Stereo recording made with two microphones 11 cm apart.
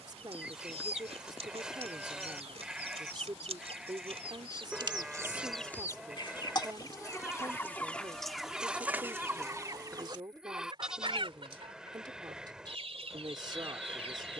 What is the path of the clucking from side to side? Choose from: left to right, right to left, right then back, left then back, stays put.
left then back.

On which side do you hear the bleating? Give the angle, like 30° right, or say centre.
10° right.